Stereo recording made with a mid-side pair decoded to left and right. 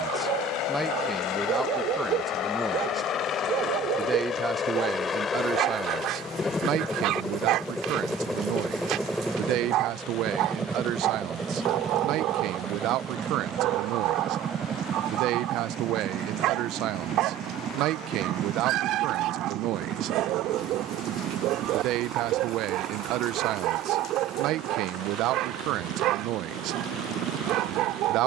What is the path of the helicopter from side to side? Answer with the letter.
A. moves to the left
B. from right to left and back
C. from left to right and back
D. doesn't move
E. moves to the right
E.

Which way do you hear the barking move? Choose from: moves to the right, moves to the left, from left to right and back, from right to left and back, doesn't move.
doesn't move.